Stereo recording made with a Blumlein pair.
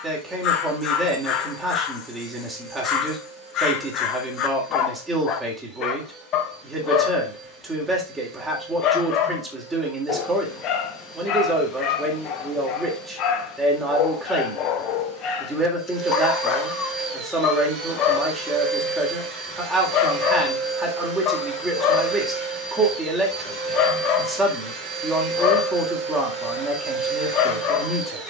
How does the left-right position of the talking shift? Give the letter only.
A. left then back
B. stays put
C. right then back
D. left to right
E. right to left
B.